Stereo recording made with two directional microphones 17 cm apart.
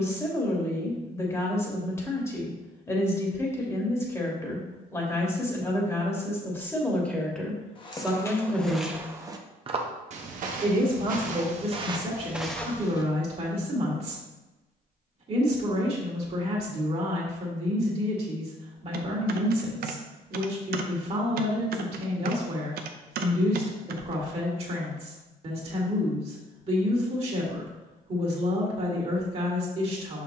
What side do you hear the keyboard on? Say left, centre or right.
right.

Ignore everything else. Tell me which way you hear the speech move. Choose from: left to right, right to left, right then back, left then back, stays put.
left to right.